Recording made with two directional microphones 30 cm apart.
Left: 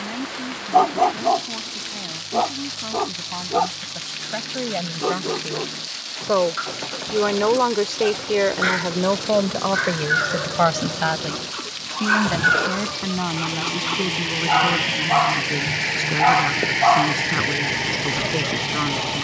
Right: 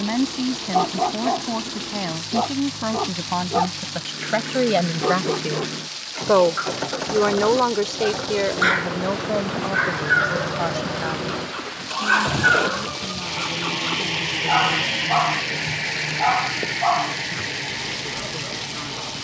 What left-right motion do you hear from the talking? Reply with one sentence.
You can hear the talking travel towards the left.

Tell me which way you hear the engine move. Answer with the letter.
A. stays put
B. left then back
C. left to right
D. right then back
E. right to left
E.